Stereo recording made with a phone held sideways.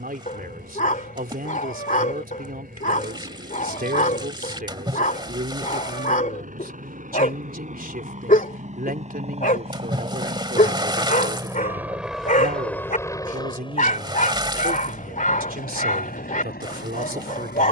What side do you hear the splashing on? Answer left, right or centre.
right.